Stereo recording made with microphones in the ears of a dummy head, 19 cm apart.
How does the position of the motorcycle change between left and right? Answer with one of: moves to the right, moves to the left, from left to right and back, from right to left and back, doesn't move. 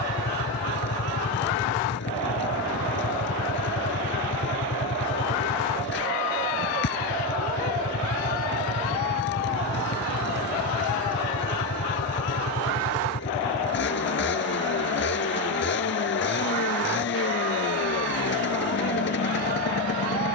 doesn't move.